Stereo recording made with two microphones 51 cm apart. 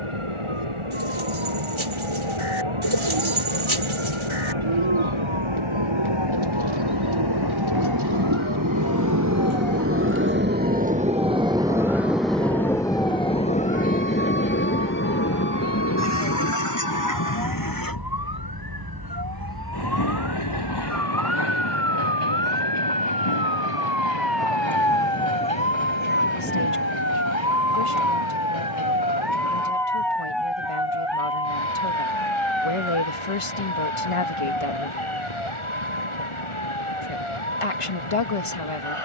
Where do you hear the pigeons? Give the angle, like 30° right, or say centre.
70° right.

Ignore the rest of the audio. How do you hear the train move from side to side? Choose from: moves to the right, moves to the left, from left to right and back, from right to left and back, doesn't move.
moves to the left.